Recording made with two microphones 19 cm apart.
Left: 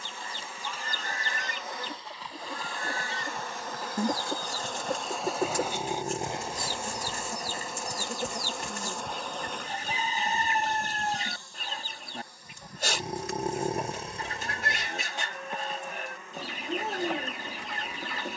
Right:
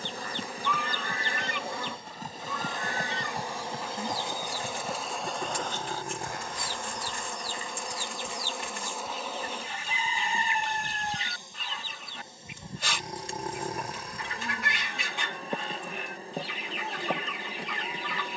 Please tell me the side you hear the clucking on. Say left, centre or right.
left.